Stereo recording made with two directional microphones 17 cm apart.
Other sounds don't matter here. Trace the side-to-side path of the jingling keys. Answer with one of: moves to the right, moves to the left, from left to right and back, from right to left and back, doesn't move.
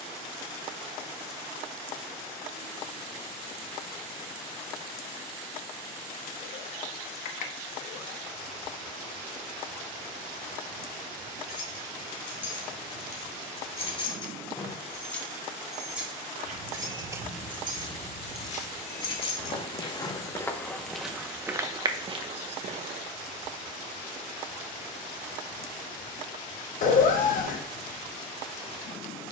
from left to right and back.